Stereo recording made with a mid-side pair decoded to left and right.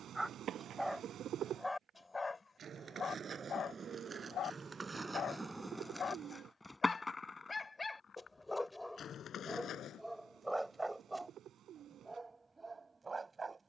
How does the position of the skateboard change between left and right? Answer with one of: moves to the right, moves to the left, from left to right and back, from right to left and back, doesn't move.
moves to the left.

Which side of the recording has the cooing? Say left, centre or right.
right.